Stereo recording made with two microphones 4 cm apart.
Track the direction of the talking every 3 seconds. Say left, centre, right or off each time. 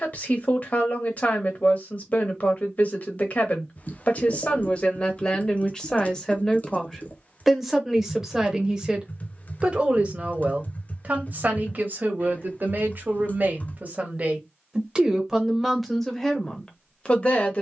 left, left, centre, right, right, centre.